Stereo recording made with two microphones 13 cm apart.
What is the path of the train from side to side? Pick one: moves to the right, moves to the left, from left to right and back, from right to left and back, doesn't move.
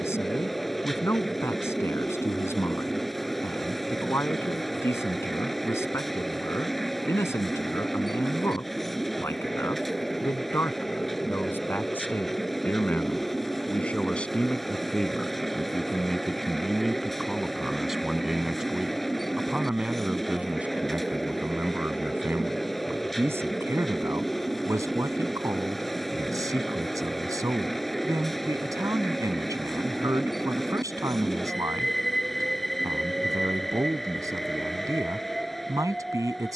doesn't move.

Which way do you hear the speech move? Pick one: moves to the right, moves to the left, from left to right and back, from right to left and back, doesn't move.
moves to the right.